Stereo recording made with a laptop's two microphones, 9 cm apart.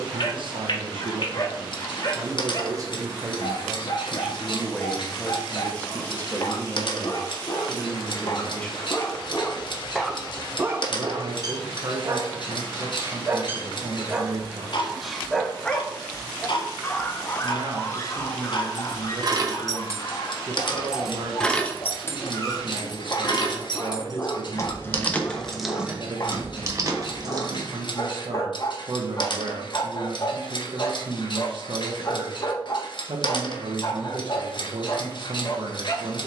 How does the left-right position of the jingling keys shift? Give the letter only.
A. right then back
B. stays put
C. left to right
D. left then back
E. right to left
D.